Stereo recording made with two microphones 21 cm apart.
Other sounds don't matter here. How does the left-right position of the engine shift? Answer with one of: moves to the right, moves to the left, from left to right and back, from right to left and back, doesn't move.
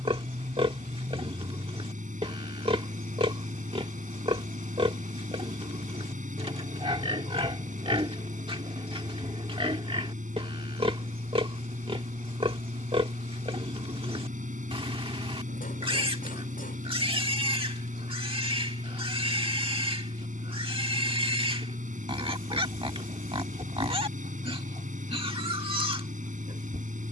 doesn't move.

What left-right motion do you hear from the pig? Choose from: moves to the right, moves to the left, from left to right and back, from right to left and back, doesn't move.
doesn't move.